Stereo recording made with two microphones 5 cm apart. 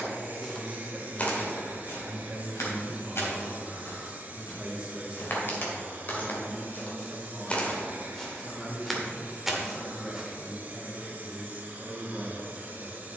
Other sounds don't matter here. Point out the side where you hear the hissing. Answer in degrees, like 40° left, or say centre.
40° right.